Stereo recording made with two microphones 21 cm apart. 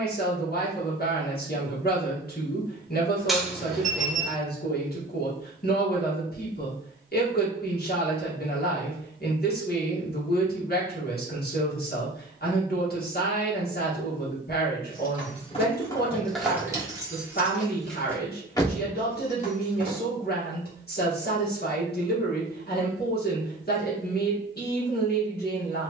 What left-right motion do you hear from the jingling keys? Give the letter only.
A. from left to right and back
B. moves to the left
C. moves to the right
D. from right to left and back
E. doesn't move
A.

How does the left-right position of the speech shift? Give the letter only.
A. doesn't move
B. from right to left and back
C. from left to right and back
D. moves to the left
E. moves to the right
A.